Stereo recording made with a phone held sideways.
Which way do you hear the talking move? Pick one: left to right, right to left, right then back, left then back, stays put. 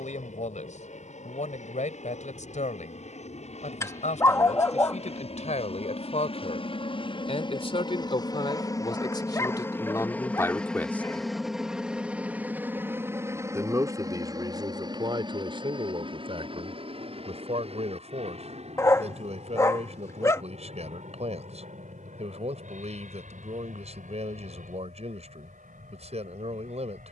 left to right.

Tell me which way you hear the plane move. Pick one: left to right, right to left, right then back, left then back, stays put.
left to right.